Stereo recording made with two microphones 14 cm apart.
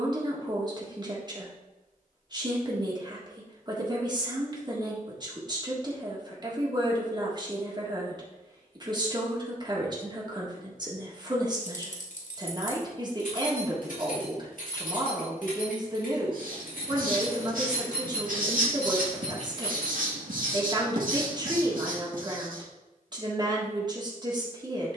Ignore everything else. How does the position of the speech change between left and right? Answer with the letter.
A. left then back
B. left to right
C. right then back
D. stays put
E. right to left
D.